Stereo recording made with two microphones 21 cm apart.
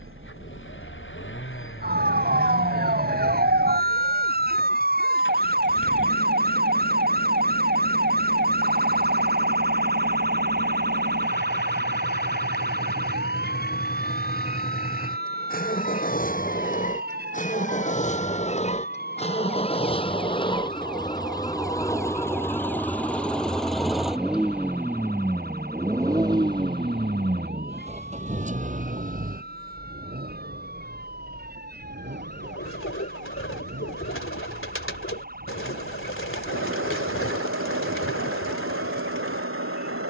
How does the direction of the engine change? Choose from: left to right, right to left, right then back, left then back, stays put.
left to right.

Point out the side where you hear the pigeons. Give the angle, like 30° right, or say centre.
70° left.